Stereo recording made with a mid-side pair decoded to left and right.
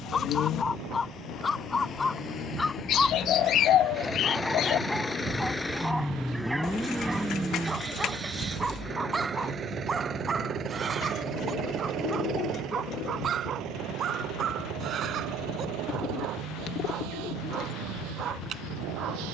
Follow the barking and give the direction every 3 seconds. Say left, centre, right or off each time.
left, centre, centre, right, right, right, right.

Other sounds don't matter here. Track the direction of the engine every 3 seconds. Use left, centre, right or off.
left, left, centre, right, right, right, right.